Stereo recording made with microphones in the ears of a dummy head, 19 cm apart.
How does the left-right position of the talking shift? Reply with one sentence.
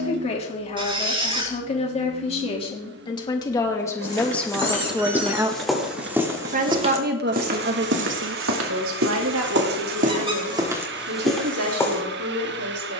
In this clip you hear the talking move to the right.